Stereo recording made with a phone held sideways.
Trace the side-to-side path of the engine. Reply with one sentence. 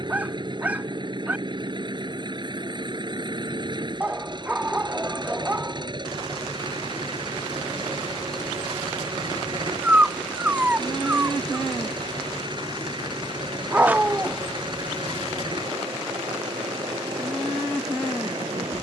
In this clip you hear the engine stay put.